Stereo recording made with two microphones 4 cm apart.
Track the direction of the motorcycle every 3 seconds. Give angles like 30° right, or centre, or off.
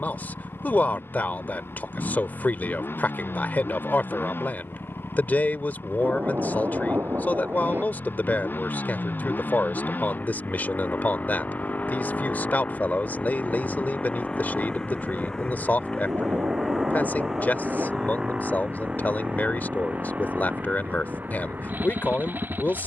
70° left, 60° left, 60° left, 50° left, 30° left, centre, 30° right, 50° right.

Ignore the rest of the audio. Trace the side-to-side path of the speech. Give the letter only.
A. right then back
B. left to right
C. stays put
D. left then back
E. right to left
C.